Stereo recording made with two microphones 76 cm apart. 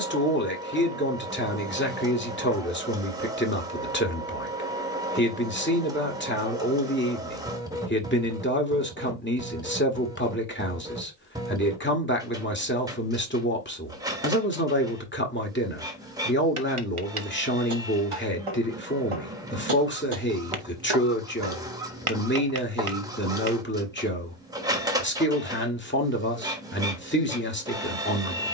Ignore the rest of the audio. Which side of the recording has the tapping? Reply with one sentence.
In this clip you hear the tapping on the right.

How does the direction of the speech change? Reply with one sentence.
You can hear the speech stay in one place.